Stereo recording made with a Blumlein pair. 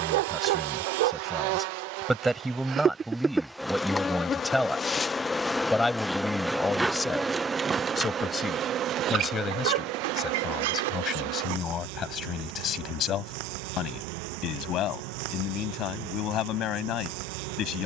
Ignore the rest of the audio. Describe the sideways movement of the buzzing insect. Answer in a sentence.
In this clip you hear the buzzing insect go left and come back.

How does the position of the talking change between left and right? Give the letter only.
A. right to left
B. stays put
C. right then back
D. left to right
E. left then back
A.